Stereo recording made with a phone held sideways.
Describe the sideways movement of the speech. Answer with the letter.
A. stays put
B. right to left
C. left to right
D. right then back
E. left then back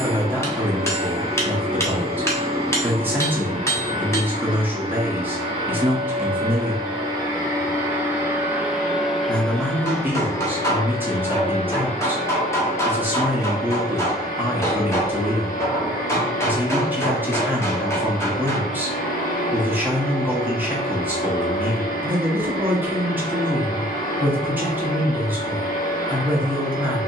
A.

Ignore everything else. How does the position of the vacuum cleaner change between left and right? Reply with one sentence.
In this clip you hear the vacuum cleaner move from right to left.